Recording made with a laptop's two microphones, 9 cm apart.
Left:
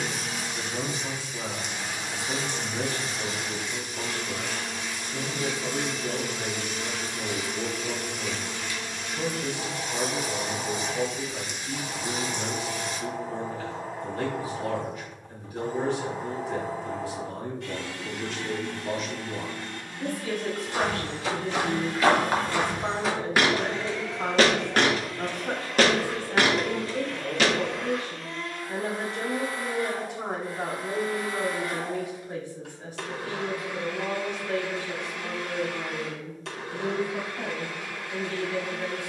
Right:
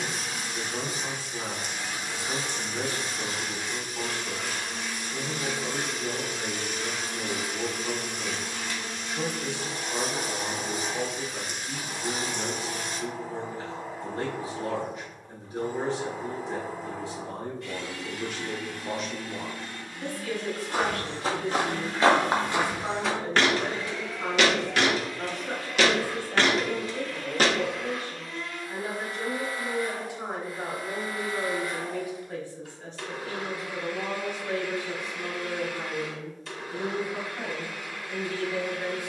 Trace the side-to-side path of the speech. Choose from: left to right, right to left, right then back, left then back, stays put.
left then back.